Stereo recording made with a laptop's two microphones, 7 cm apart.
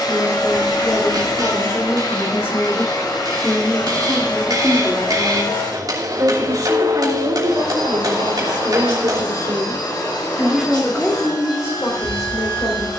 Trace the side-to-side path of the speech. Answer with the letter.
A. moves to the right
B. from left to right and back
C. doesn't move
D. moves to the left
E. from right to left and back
B.